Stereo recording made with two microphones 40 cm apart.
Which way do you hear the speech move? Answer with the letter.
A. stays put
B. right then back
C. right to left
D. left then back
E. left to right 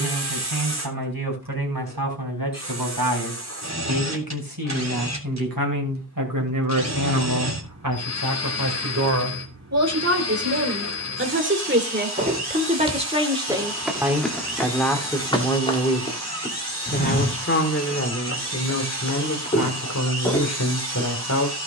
C.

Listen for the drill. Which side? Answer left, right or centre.
right.